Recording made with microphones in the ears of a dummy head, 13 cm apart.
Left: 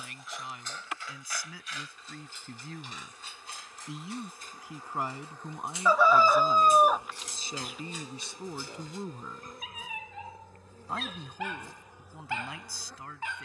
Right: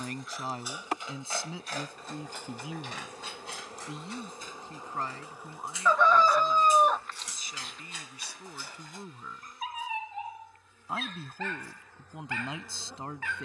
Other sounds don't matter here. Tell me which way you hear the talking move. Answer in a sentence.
You can hear the talking move from right to left and back again.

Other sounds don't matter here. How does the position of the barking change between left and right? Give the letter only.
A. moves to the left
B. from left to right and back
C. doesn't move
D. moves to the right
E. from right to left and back
B.